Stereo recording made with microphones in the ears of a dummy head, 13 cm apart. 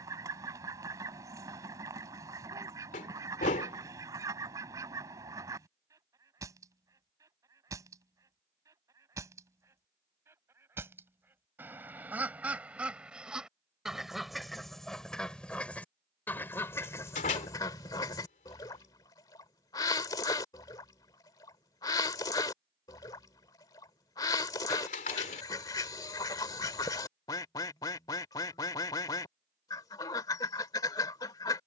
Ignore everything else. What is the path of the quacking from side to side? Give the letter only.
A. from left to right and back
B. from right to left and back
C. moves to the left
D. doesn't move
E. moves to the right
C.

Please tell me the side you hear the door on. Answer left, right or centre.
left.